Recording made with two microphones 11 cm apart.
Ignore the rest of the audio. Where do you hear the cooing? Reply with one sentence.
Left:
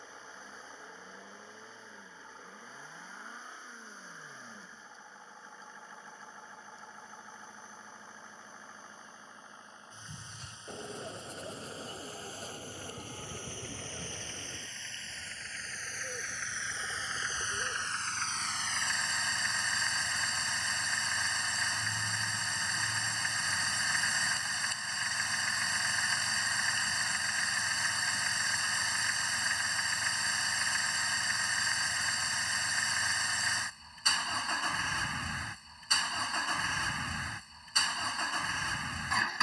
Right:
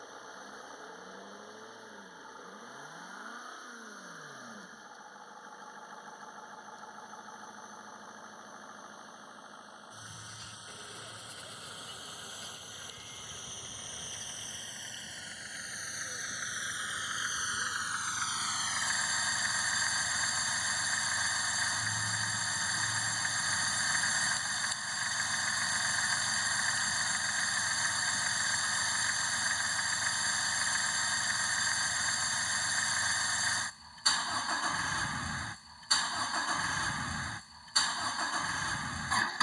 In this clip you hear the cooing on the left.